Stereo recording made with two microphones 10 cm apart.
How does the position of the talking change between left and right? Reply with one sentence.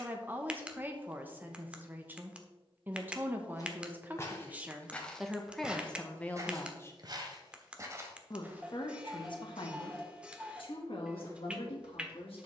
You can hear the talking travel towards the left.